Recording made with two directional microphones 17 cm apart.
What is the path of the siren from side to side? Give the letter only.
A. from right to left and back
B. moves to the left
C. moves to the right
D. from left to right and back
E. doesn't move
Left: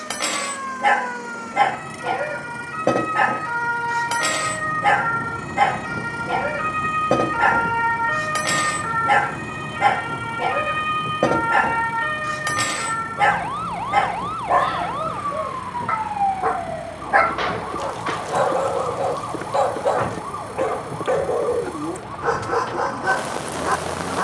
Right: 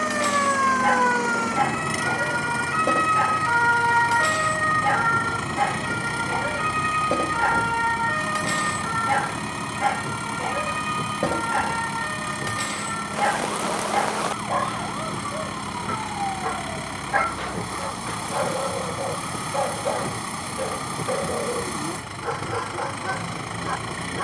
B.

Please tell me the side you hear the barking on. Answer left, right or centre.
left.